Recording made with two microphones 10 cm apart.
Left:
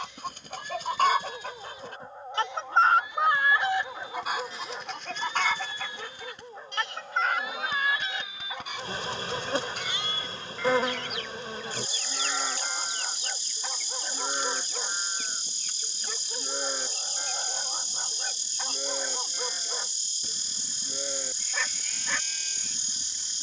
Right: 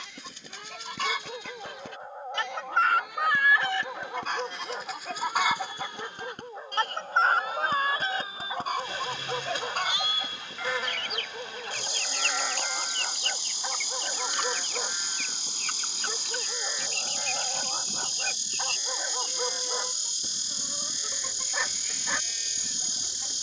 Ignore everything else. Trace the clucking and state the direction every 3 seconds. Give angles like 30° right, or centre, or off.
50° left, centre, 40° right, 60° right, 70° right, 70° right, 80° right, 80° right.